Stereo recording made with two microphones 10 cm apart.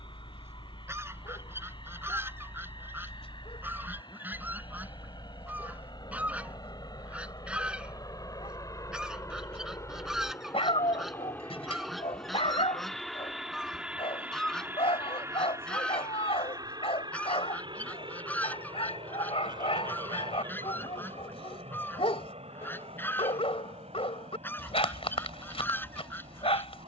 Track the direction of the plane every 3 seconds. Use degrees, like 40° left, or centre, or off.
60° left, 50° left, 40° left, 30° left, centre, 40° right, 60° right, 70° right, 80° right.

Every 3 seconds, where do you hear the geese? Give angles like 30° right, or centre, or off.
20° right, 20° right, 10° right, 10° right, centre, 10° left, 20° left, 20° left, 20° left.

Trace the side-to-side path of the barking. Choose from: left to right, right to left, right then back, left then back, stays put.
stays put.